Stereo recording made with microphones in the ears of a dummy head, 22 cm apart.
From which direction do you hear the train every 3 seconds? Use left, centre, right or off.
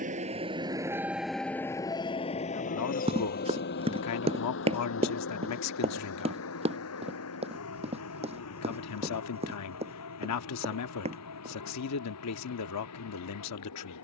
centre, left, left, left, left.